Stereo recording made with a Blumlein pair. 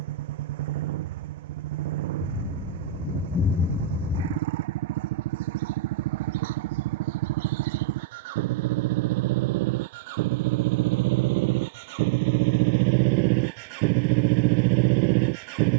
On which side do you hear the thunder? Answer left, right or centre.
left.